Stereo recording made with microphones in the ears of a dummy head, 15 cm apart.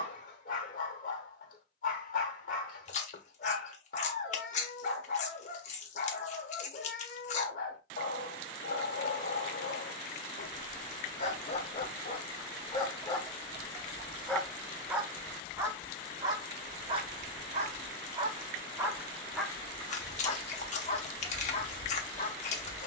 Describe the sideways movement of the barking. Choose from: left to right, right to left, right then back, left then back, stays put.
right then back.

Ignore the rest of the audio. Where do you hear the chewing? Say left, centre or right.
left.